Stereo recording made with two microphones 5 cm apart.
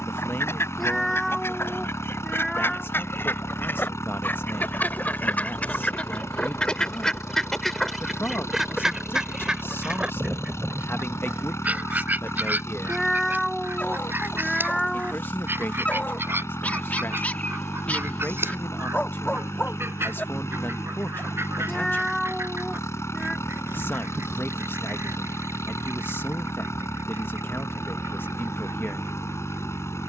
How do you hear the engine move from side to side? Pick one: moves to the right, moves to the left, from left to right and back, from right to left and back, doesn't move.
doesn't move.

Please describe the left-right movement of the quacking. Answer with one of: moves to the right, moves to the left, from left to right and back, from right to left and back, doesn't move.
moves to the right.